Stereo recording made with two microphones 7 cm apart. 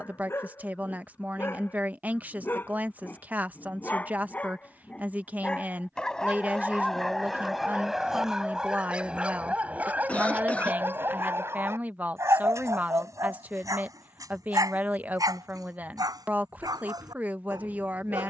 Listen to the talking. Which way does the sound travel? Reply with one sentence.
In this clip you hear the talking stay put.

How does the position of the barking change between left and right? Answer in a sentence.
In this clip you hear the barking move from left to right.